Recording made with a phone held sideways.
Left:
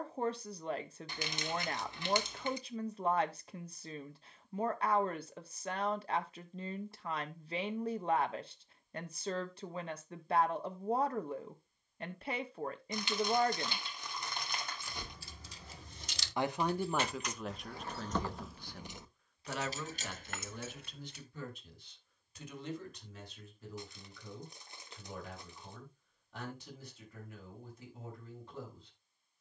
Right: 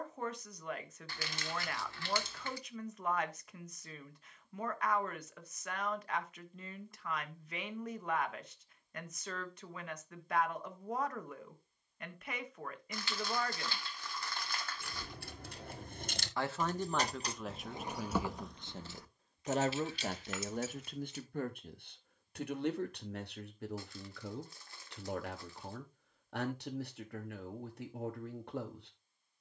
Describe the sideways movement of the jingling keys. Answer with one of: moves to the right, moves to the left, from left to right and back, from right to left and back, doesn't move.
moves to the left.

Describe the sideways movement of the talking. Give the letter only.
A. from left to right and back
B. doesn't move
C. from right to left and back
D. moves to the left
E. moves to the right
E.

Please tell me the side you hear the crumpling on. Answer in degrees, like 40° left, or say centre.
20° left.